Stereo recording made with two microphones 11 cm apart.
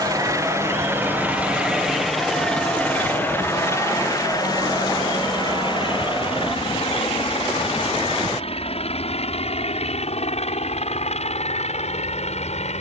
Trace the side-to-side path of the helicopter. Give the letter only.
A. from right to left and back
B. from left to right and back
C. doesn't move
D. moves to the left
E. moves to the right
D.